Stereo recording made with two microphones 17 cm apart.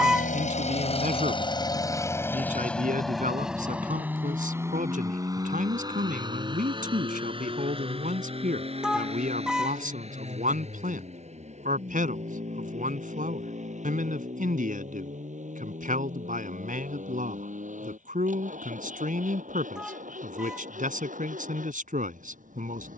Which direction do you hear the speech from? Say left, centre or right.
right.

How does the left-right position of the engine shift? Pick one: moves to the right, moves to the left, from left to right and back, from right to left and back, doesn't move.
moves to the right.